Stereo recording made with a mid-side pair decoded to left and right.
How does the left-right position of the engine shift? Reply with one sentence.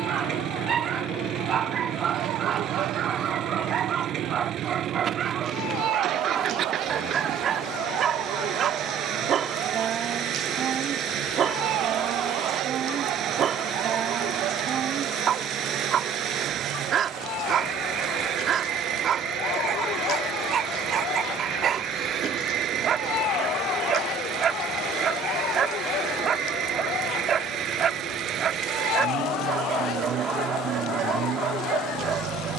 In this clip you hear the engine stay put.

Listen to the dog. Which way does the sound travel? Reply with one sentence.
In this clip you hear the dog stay put.